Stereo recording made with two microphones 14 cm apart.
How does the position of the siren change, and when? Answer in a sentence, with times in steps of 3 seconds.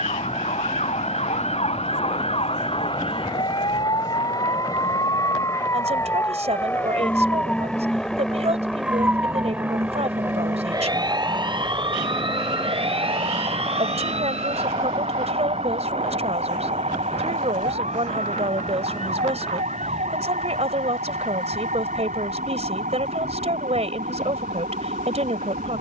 In this clip you hear the siren on the left from 0 s, in the centre from 6 s and on the right from 9 s.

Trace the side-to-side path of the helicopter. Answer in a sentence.
In this clip you hear the helicopter move from left to right.